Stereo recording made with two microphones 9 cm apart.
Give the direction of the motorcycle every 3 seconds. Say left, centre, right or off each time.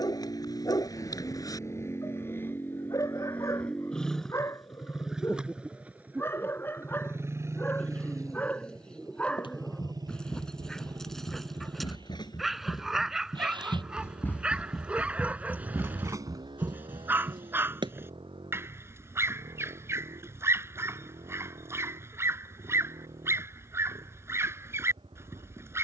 left, centre, right, right, right, right, right, right, right.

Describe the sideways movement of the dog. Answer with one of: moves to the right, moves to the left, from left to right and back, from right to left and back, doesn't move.
moves to the right.